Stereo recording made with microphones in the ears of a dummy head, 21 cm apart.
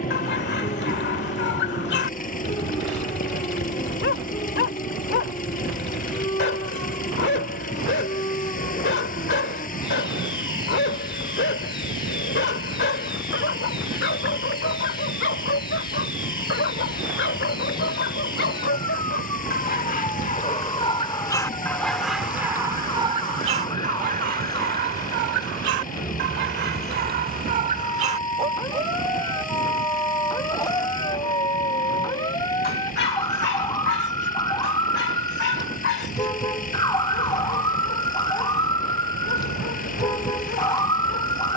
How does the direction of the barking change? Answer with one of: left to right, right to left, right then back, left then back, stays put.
right then back.